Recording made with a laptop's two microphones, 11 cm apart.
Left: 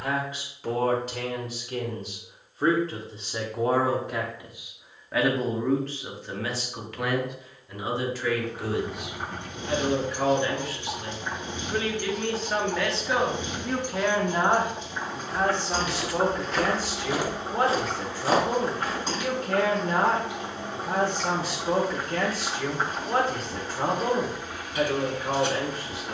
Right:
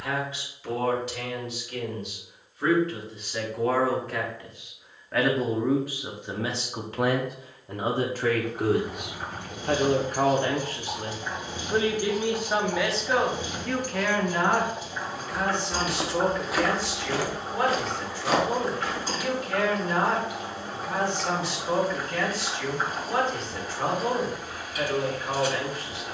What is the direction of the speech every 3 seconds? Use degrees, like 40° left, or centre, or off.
40° left, 10° left, 40° right, 50° right, centre, 40° left, 50° left, 50° left, 50° left.